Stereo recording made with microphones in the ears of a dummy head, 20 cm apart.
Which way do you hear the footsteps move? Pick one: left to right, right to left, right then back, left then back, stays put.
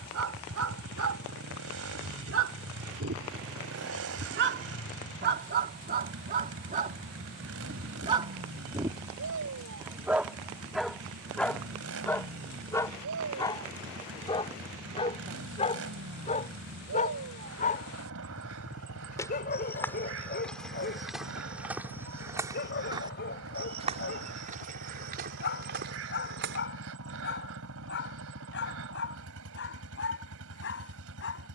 left to right.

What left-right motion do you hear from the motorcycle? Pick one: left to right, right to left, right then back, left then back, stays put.
stays put.